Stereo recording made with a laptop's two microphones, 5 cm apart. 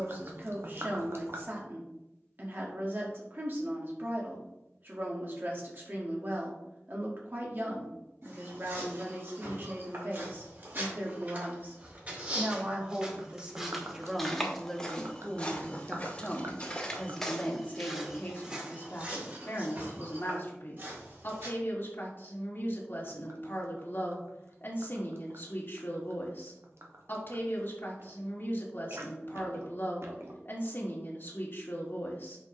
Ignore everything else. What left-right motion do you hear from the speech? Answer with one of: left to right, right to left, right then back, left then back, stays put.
right to left.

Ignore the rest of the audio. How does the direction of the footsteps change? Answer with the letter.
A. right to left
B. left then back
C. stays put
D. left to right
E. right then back
B.